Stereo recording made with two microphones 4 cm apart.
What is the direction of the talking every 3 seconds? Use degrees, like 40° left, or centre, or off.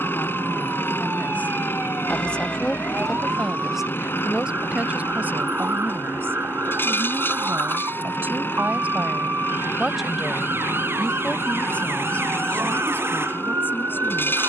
40° left, 30° right, 50° right, 10° left, 50° left.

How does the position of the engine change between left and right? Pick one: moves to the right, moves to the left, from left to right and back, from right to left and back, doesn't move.
doesn't move.